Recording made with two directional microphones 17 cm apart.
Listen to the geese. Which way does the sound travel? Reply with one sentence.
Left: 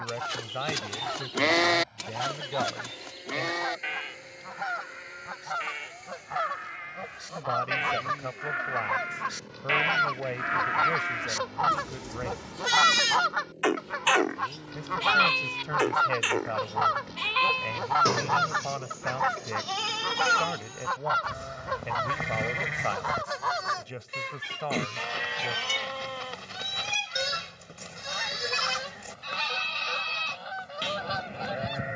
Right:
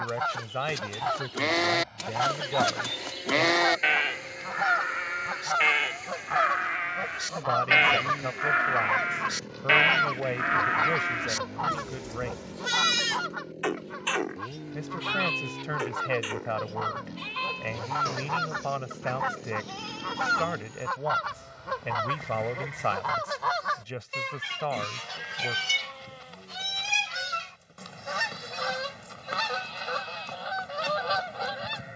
In this clip you hear the geese go left and come back.